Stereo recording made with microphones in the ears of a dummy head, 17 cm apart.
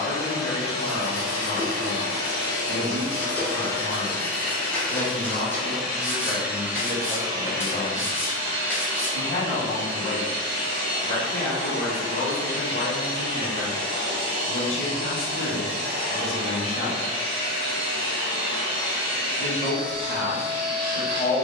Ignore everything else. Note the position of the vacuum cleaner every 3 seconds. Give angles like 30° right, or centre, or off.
30° left, 10° left, 20° right, 30° right, 30° right, 30° right, 30° right.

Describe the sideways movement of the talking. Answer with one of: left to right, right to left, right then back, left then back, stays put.
stays put.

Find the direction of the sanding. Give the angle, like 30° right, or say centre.
10° left.